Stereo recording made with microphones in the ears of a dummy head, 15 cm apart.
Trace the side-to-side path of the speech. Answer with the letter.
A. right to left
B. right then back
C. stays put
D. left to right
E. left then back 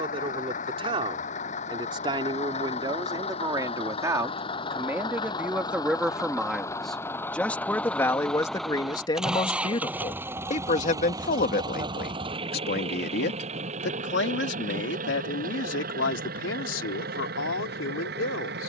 A.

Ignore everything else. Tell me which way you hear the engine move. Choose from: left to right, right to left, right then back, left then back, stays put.
left to right.